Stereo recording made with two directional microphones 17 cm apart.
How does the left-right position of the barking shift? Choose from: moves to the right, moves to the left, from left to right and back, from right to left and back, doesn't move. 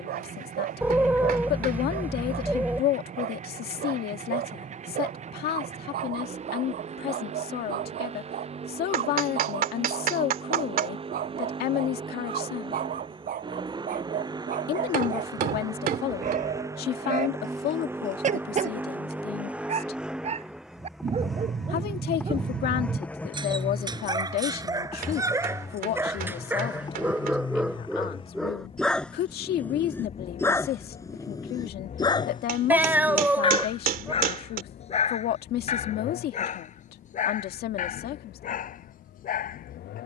moves to the left.